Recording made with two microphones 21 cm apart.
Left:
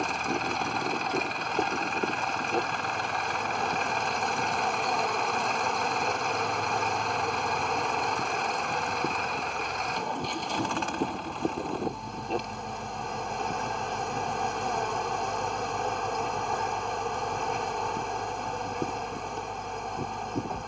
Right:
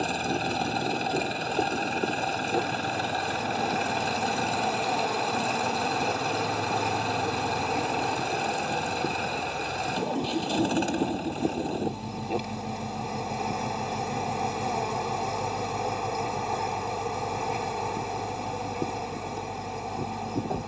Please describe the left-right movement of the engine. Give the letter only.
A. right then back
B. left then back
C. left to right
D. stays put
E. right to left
D.